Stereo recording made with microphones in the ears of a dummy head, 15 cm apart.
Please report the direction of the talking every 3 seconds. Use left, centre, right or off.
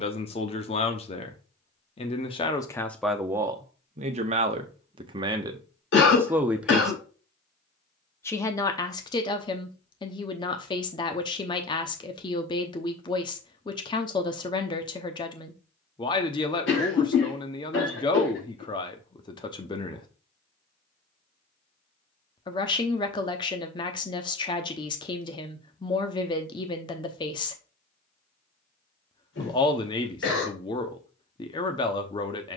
left, right, centre, left, left, left, left, left, left, left, left.